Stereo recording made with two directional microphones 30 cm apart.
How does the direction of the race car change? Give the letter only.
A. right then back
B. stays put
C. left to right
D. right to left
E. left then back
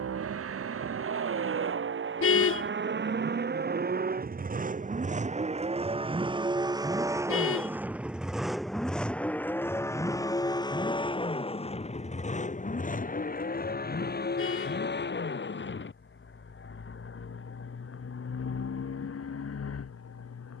D.